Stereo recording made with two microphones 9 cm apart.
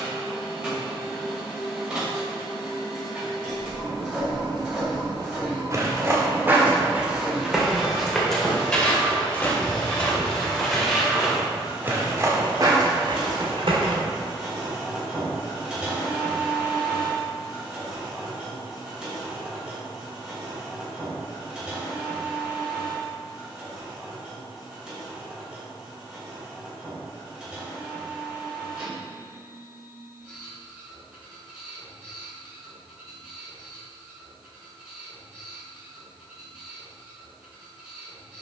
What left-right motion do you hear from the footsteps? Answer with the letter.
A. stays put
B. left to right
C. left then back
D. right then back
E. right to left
C.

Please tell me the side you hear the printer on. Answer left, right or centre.
centre.